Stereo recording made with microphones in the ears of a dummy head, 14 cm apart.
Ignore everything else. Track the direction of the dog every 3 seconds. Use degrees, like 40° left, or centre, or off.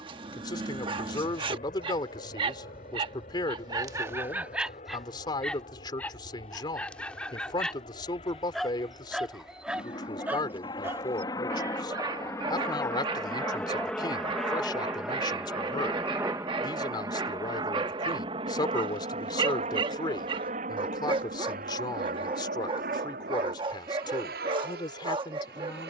30° right, 10° right, 10° left, 10° right, 30° right, 30° right, 30° right, 30° right, 30° right.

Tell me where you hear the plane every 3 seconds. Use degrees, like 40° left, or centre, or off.
50° left, 50° left, 40° left, 30° left, 10° left, 20° right, 40° right, 60° right, 60° right.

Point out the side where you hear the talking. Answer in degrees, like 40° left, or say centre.
30° left.